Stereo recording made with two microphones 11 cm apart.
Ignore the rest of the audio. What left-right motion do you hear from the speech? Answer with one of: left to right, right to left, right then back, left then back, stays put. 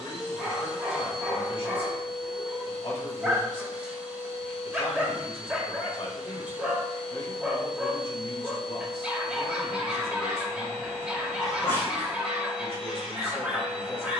stays put.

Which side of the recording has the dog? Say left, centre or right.
centre.